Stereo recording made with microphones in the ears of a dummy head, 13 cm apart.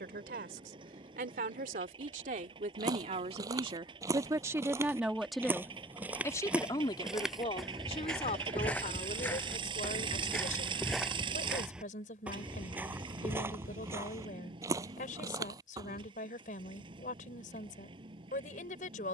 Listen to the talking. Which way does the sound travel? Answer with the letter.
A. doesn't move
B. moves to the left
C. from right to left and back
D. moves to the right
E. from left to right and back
B.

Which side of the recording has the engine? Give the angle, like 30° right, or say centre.
30° right.